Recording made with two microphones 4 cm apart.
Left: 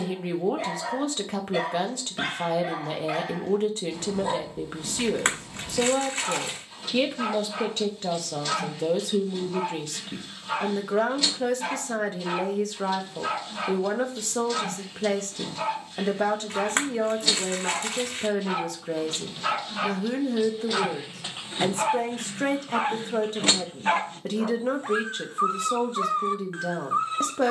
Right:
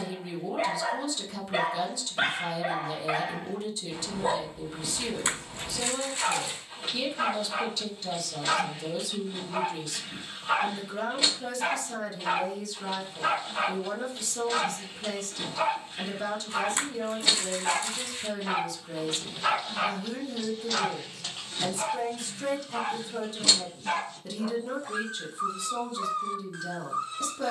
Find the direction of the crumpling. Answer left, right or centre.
left.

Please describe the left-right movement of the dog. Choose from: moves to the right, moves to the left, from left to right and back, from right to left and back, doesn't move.
moves to the left.